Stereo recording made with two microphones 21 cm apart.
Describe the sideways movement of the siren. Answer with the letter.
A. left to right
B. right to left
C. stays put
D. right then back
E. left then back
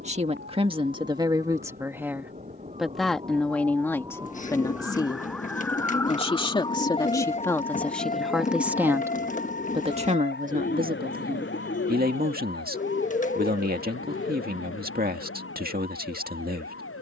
B.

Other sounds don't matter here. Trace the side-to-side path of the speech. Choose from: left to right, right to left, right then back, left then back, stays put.
left then back.